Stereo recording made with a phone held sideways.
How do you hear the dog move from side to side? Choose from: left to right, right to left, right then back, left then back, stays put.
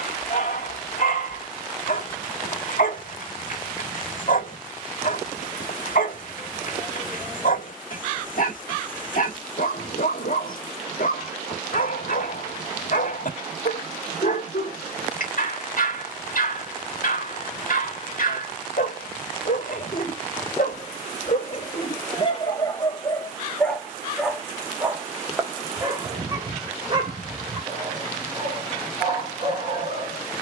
left to right.